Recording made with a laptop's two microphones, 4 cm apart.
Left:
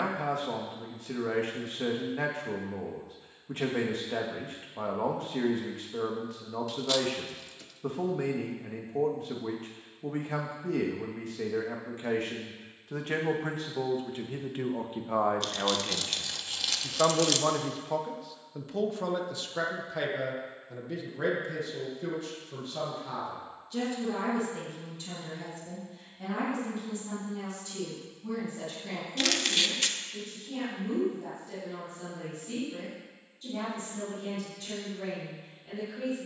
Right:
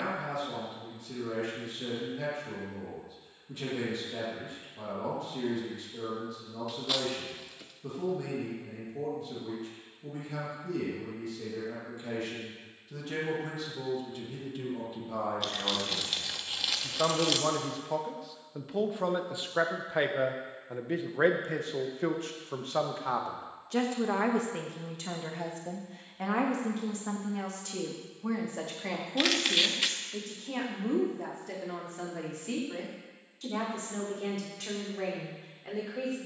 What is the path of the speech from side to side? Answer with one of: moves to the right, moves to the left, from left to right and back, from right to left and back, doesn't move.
moves to the right.